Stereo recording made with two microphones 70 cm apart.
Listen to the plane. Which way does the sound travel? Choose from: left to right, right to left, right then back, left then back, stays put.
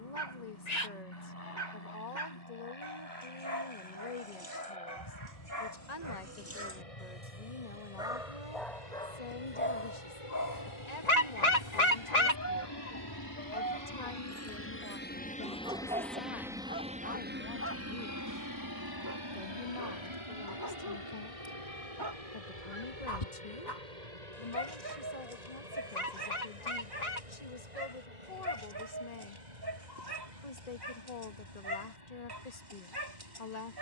left to right.